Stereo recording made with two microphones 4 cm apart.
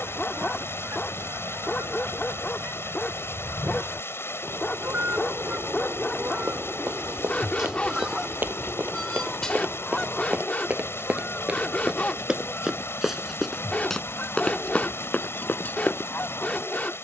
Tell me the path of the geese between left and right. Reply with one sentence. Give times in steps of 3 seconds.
In this clip you hear the geese on the right from 0 s, in the centre from 6 s and on the left from 9 s.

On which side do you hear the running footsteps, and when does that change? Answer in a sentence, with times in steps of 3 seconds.
In this clip you hear the running footsteps not at all from 0 s, on the right from 6 s, in the centre from 12 s and on the left from 15 s.